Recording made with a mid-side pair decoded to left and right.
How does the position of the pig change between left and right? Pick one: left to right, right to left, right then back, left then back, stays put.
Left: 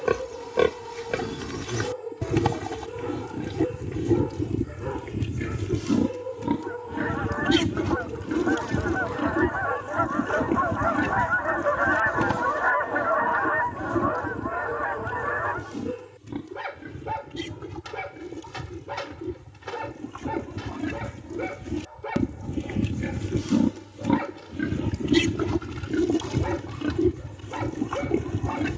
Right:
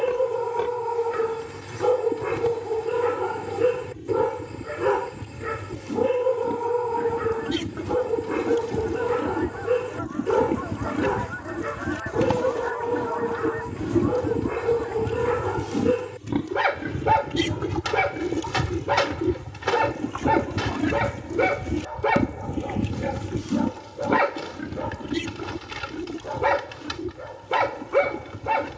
right then back.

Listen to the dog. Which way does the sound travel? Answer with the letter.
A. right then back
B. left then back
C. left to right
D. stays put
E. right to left
D.